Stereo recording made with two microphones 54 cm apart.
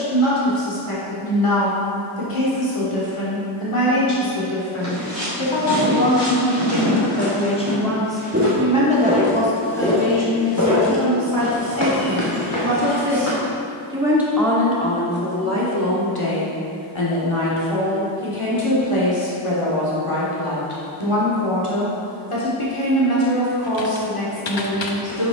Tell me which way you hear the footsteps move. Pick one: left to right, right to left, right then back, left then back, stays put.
right to left.